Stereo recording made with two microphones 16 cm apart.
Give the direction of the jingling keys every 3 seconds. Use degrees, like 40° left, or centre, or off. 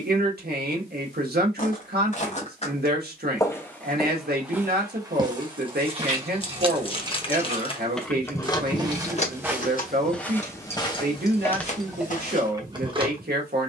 off, off, 10° right, 40° left, 30° right.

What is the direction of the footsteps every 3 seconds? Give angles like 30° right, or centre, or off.
50° left, 10° right, 40° right, 20° left, 60° left.